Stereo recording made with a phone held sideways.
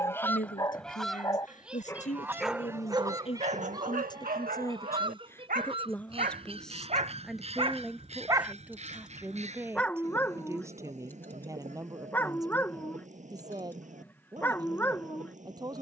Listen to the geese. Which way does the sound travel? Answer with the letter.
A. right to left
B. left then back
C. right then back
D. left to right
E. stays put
D.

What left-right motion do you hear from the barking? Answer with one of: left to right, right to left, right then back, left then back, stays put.
right then back.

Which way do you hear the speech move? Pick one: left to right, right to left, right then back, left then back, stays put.
left to right.